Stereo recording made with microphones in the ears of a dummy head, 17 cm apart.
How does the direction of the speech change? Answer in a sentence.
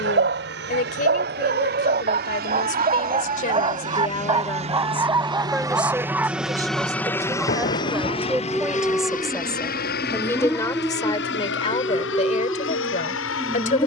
You can hear the speech go right and come back.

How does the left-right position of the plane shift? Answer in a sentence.
In this clip you hear the plane move from right to left.